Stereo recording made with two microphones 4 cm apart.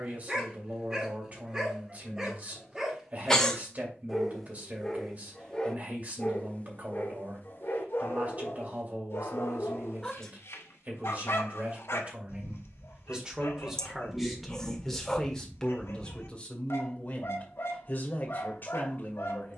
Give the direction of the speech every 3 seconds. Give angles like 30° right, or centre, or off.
40° right, 40° right, 40° right, 40° right, 10° right, 20° left, 40° left.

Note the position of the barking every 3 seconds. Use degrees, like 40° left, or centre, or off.
20° right, 10° left, 50° left, 80° left, 80° left, 80° left, 80° left.